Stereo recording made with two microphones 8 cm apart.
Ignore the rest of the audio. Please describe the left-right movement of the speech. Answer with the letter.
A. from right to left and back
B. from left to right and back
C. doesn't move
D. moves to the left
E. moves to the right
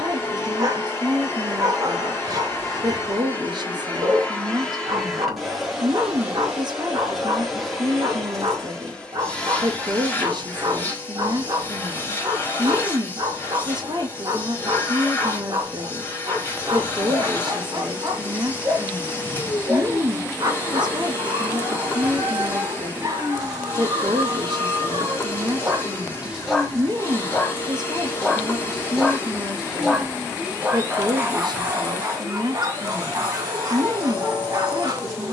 C.